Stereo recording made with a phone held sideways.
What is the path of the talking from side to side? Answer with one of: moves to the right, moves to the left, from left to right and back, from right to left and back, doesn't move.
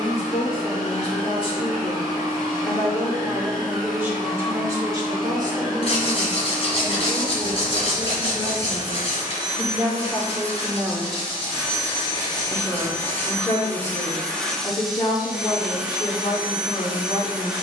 from left to right and back.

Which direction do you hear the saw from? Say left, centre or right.
left.